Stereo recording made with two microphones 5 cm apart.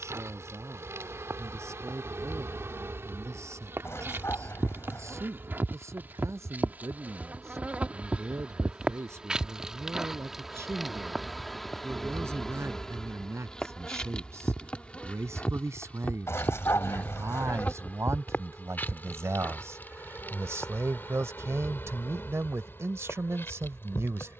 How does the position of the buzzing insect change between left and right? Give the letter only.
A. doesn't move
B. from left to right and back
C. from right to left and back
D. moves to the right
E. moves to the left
E.